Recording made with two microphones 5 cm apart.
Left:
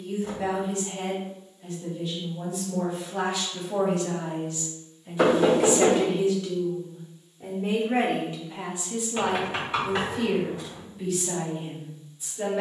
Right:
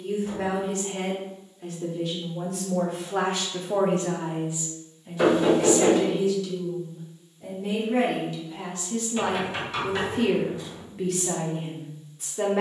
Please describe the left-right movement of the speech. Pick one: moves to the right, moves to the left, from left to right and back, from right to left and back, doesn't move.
from right to left and back.